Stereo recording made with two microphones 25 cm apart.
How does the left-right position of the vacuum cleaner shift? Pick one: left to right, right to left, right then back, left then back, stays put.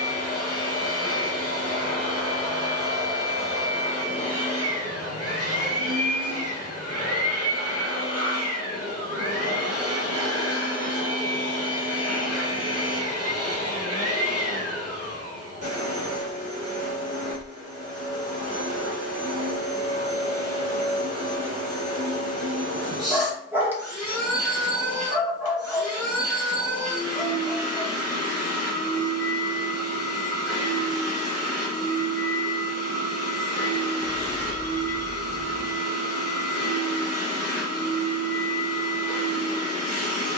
stays put.